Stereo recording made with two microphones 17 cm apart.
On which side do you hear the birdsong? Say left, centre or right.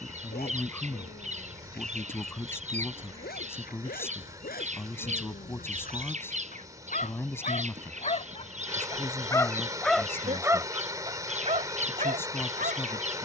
right.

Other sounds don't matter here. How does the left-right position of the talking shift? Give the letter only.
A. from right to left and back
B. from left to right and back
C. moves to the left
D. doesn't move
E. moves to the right
D.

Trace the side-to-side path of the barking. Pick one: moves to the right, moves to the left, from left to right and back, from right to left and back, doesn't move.
moves to the right.